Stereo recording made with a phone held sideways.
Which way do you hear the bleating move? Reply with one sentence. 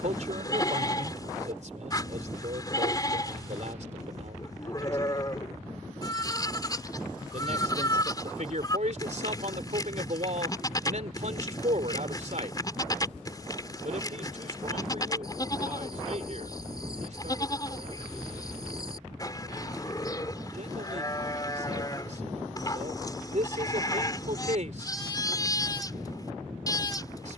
You can hear the bleating stay in one place.